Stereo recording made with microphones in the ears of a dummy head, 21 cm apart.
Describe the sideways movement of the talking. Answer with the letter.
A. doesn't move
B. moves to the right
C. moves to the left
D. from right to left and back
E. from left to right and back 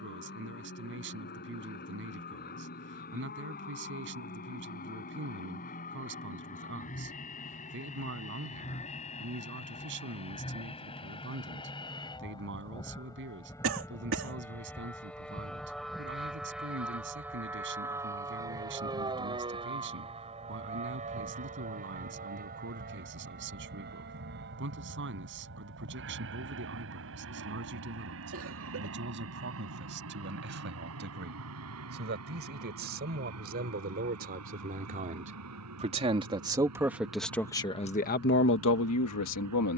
C.